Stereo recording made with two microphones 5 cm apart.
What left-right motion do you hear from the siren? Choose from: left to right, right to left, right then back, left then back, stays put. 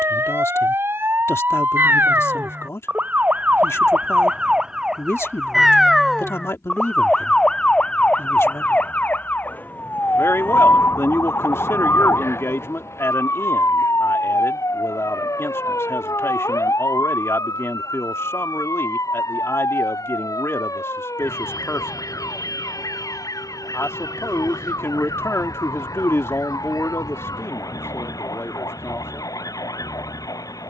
right to left.